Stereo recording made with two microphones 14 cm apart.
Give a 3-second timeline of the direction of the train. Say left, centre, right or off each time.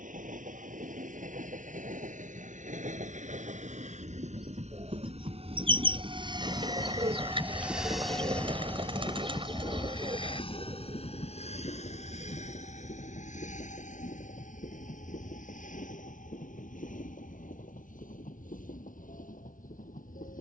right, right, centre, left, left, left, left.